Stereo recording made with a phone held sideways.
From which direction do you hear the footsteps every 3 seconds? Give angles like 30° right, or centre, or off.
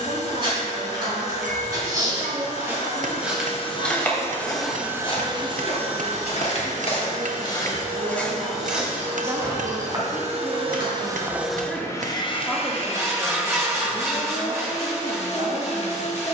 30° right, 30° left, 30° left, 30° right, off, off.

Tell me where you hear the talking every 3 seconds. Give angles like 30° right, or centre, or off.
80° right, 80° right, 60° right, centre, 30° right, 60° right.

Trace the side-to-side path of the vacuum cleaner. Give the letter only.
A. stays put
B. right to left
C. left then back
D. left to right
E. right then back
E.